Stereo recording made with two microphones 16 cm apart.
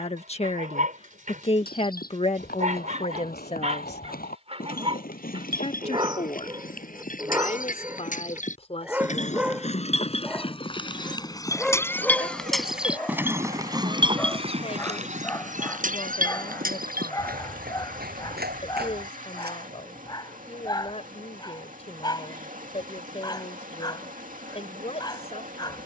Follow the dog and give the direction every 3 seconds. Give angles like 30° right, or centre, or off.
50° right, 40° right, 20° right, centre, 10° left, 20° left, 20° left, 30° left, 30° left.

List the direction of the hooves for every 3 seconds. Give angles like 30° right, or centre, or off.
70° left, 60° left, 60° left, 30° left, 20° right, 60° right, 70° right, off, off.